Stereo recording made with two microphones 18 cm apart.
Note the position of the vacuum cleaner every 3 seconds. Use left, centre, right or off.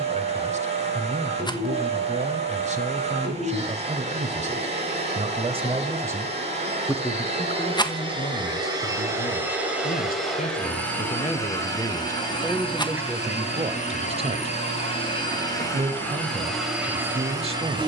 right, right, right, centre, left, centre.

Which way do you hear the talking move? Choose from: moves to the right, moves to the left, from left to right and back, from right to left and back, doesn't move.
from right to left and back.